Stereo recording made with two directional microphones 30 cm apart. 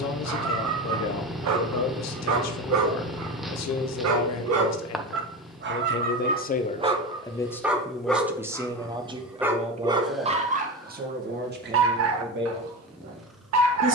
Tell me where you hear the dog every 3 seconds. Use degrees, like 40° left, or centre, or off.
60° right, 50° right, 10° right, 20° right, 60° right.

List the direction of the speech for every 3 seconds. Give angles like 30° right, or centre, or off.
60° left, 60° left, 10° left, 30° right, 40° right.